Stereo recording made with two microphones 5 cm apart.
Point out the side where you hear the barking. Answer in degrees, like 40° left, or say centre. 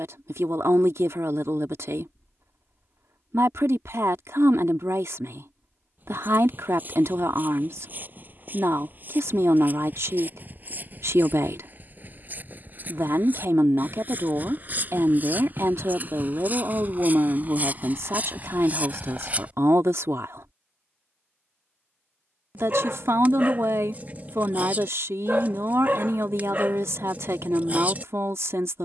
40° right.